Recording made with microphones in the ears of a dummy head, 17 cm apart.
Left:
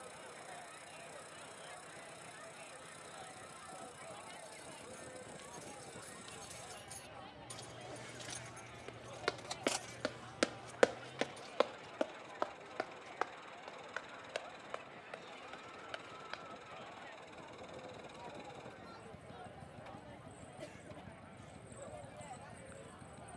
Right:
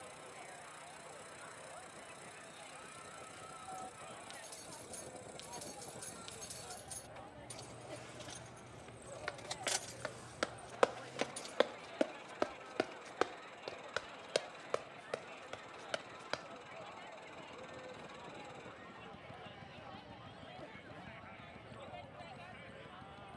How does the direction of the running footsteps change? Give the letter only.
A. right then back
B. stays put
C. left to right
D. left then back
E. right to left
C.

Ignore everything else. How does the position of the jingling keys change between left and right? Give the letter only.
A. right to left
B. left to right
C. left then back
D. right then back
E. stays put
C.